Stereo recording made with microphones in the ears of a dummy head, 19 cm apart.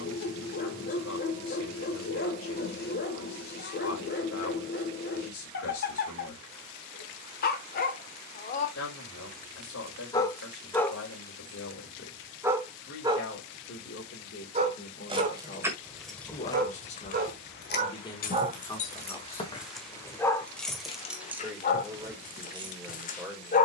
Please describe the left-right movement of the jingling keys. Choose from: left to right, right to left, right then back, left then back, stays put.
left then back.